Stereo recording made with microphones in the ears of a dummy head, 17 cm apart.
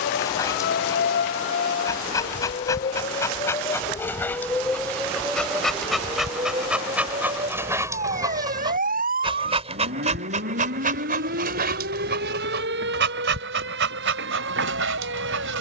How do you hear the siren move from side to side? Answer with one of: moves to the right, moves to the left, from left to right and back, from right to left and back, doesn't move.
moves to the right.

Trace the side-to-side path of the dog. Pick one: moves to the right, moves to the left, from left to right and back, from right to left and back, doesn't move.
moves to the right.